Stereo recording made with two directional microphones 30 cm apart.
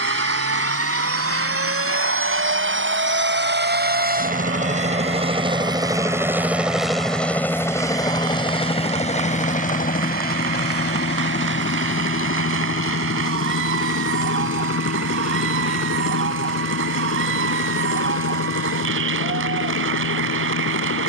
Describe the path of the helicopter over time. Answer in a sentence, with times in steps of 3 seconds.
In this clip you hear the helicopter on the right from 0 s, in the centre from 6 s and on the left from 9 s.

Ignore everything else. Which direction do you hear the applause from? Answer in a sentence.
In this clip you hear the applause on the right.